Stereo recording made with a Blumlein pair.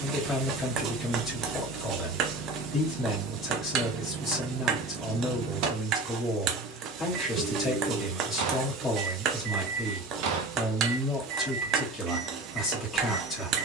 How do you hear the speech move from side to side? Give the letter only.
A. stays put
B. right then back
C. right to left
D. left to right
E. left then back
A.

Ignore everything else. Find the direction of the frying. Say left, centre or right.
right.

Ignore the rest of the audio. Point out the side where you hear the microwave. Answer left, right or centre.
right.